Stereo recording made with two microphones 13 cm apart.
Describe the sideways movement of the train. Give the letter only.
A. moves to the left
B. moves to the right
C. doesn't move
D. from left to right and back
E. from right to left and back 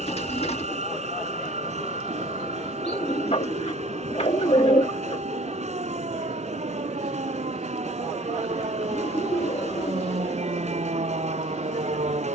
C.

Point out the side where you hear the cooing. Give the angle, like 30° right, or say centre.
50° left.